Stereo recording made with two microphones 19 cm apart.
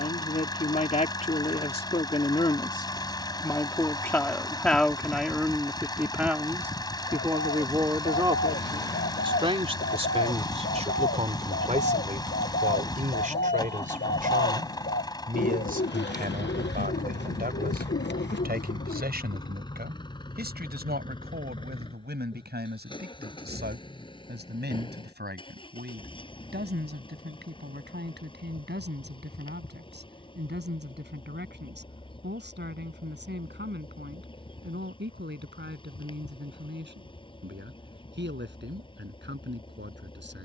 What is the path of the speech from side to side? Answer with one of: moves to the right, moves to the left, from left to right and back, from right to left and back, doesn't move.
moves to the right.